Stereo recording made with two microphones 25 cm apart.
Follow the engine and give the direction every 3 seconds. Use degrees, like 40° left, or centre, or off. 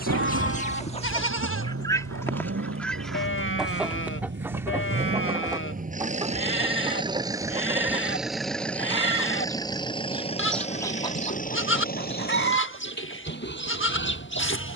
60° right, 40° right, 10° right, 20° left, 40° left.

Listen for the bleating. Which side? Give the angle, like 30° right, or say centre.
50° left.